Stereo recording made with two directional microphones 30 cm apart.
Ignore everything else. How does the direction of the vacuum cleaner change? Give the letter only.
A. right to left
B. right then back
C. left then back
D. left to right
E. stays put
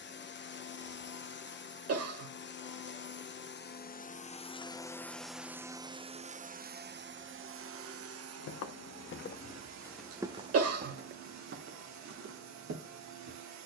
D.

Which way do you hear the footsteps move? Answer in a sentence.
You can hear the footsteps move to the right.